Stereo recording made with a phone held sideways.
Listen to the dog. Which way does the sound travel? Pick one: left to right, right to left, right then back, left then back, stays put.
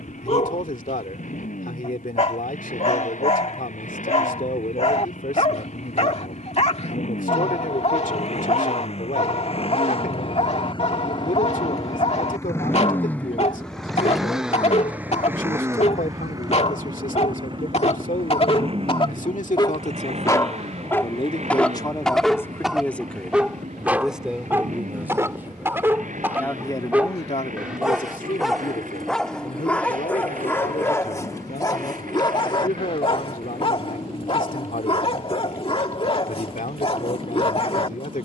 right then back.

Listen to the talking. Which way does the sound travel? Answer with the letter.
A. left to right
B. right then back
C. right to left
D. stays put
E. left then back
B.